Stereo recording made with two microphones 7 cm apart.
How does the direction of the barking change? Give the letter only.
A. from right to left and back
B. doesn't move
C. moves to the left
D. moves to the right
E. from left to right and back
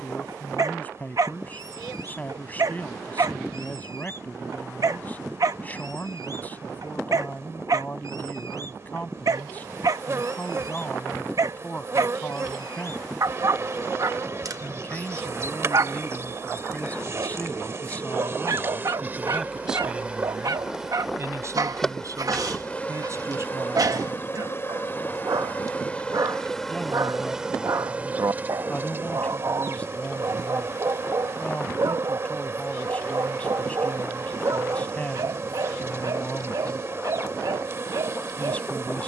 B.